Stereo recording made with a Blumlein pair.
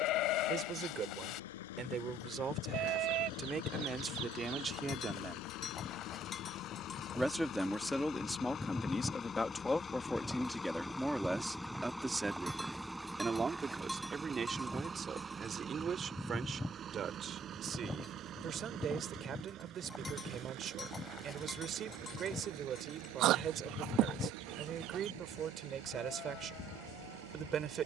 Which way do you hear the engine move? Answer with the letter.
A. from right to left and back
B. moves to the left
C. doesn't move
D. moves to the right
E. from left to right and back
D.